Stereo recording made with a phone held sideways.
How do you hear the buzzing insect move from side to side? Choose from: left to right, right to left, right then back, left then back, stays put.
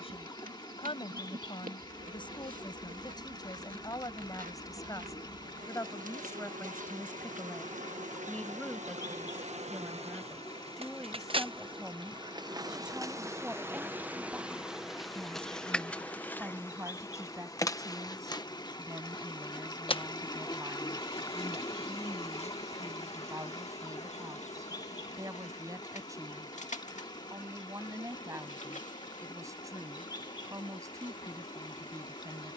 right to left.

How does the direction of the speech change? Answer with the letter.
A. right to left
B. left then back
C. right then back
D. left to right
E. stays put
D.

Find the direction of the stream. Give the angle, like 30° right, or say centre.
30° left.